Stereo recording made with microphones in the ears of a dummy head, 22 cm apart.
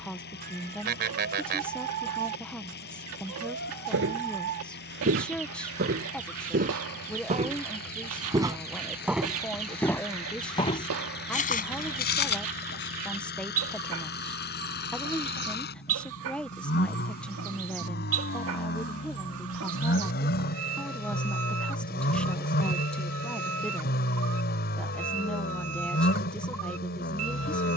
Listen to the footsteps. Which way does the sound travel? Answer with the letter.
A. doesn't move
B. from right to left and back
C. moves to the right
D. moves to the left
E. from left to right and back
D.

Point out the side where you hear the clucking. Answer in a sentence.
You can hear the clucking on the right.